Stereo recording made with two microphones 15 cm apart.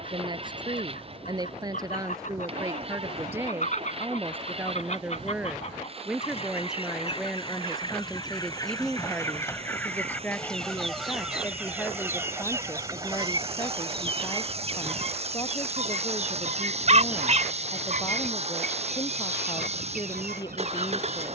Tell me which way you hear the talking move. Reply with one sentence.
In this clip you hear the talking move from right to left.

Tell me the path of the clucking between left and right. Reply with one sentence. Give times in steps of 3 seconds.
In this clip you hear the clucking on the left from 0 s, in the centre from 9 s and on the right from 12 s.